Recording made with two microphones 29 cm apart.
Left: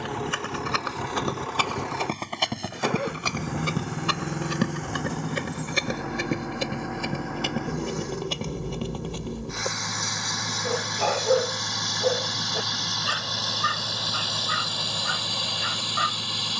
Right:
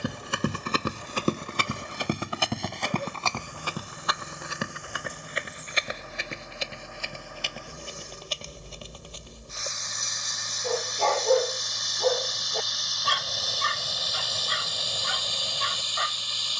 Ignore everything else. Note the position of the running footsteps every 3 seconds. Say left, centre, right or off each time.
right, left, left, left, off, off.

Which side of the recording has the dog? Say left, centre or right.
centre.